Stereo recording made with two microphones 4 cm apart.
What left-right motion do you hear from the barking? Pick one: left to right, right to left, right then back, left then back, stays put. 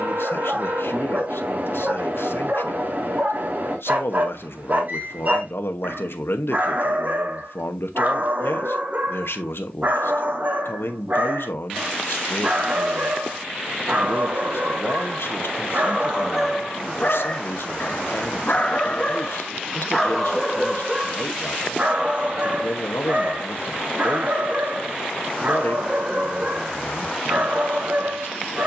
left then back.